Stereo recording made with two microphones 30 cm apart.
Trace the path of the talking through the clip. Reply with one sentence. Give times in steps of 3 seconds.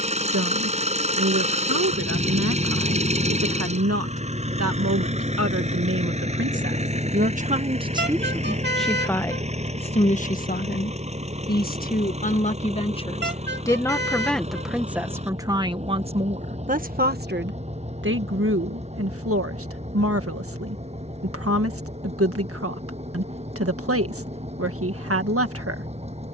You can hear the talking on the right from 0 s, on the left from 9 s, in the centre from 12 s and on the right from 15 s.